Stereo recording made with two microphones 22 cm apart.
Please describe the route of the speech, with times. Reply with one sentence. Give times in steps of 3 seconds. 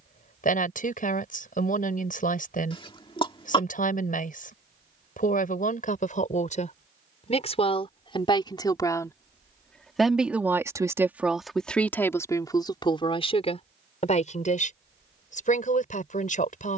You can hear the speech on the left from 0 s, in the centre from 9 s and on the left from 12 s.